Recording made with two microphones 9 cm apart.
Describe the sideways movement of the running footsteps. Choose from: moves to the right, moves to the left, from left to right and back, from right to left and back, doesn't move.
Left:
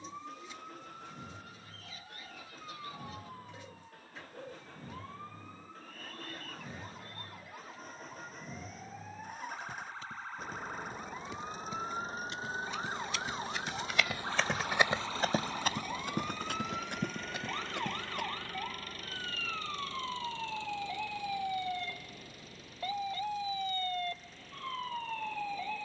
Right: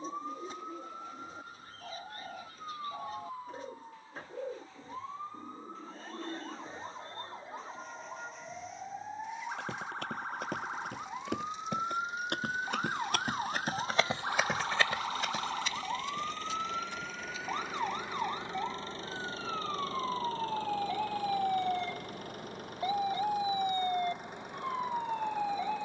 moves to the left.